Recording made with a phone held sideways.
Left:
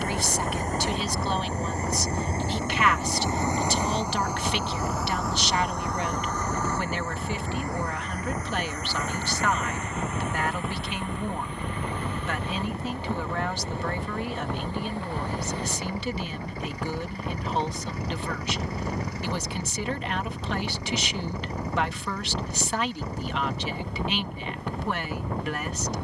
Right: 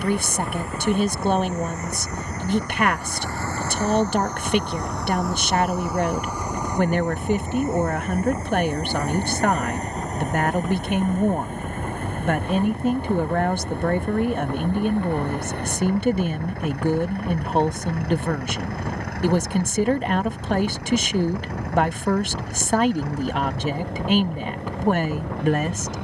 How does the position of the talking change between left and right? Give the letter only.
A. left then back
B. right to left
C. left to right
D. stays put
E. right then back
D.